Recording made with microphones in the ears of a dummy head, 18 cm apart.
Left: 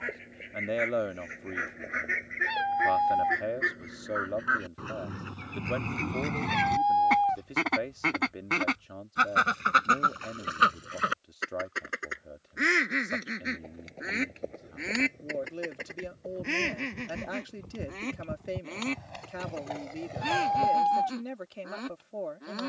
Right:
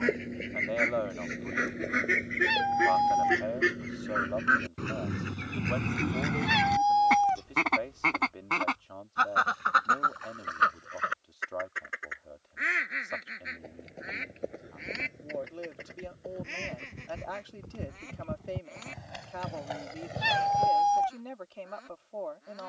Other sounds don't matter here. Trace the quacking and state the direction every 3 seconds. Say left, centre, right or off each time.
right, right, centre, left, left, left, left, left.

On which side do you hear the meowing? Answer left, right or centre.
right.